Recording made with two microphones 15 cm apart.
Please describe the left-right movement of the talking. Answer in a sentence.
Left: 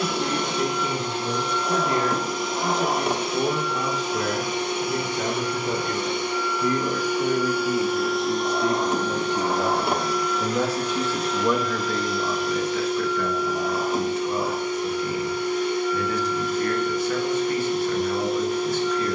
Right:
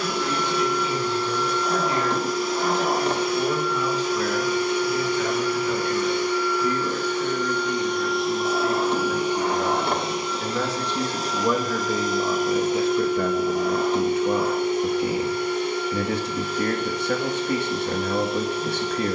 You can hear the talking go from the left side to the right.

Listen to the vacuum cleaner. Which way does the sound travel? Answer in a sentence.
In this clip you hear the vacuum cleaner move from left to right.